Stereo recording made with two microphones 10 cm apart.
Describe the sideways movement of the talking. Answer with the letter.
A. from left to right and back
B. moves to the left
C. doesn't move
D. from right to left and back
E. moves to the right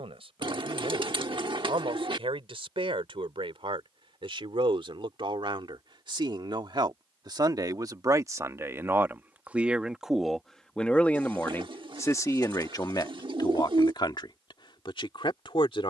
B.